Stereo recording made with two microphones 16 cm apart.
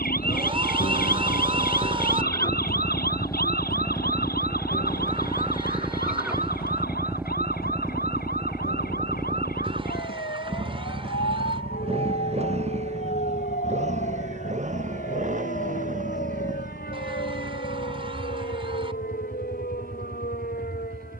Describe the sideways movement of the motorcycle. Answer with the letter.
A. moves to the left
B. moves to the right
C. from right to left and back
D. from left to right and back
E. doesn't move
B.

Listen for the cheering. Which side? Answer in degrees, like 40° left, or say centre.
30° right.